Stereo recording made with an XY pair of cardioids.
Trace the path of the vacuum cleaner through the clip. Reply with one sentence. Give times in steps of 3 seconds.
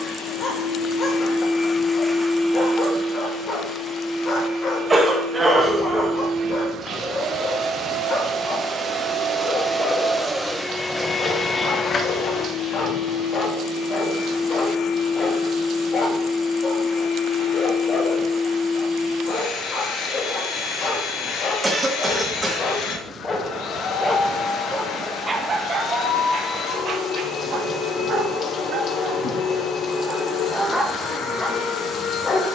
In this clip you hear the vacuum cleaner on the left from 0 s, on the right from 3 s, in the centre from 9 s and on the left from 12 s.